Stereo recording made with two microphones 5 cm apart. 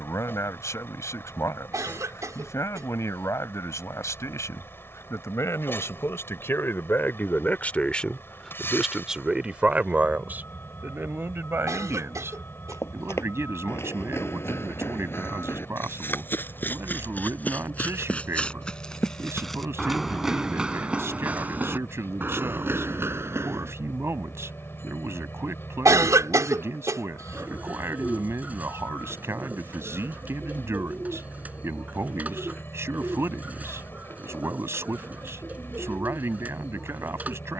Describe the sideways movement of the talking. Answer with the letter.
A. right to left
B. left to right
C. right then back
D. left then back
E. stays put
B.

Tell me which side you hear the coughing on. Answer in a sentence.
You can hear the coughing on the right.